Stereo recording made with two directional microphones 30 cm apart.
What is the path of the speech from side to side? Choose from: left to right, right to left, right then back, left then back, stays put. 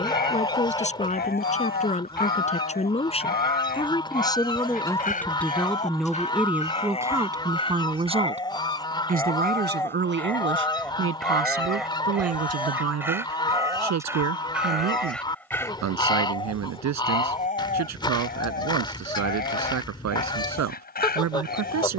left to right.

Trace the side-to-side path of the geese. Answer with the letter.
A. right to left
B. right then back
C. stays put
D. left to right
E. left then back
C.